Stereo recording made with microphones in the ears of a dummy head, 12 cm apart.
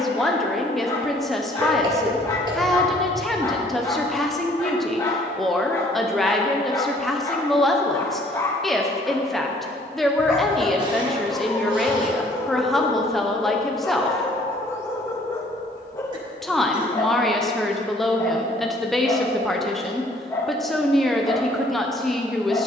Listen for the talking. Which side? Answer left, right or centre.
centre.